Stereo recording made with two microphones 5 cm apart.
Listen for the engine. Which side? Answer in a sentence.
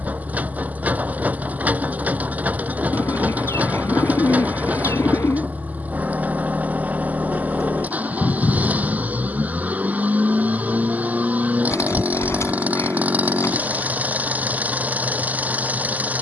In this clip you hear the engine on the right.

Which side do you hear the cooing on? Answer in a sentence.
You can hear the cooing on the left.